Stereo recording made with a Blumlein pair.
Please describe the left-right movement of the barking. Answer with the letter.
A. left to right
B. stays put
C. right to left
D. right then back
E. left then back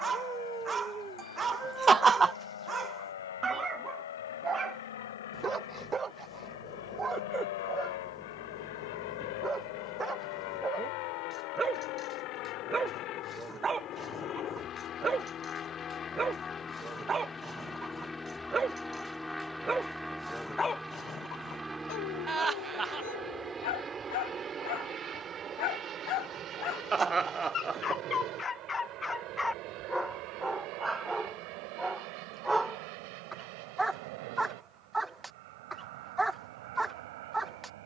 E.